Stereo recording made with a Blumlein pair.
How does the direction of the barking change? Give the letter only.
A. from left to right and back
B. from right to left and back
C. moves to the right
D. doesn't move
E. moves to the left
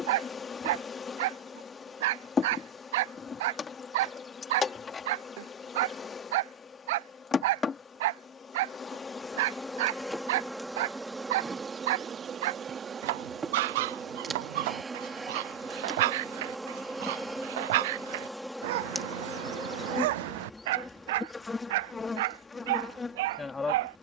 D.